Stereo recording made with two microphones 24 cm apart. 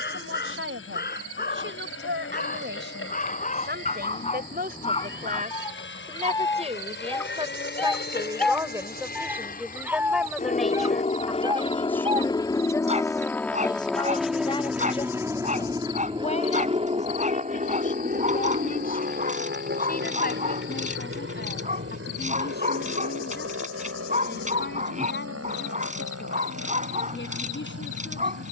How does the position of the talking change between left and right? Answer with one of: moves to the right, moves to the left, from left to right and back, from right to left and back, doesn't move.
moves to the left.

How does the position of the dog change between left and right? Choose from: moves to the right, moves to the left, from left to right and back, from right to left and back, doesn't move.
moves to the right.